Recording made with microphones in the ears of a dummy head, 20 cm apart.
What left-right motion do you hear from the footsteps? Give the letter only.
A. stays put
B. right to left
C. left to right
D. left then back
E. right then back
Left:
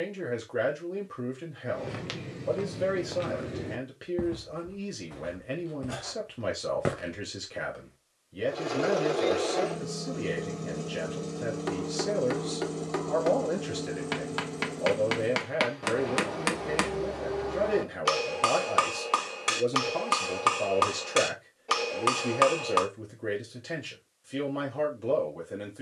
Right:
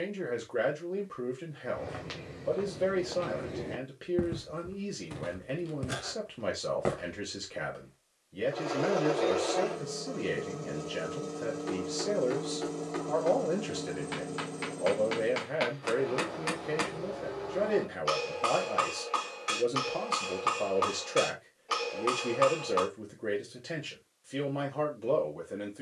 E.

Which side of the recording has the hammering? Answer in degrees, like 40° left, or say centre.
60° left.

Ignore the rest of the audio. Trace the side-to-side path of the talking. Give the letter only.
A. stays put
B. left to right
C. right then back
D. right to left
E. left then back
A.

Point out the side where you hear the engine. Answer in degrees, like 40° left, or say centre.
20° left.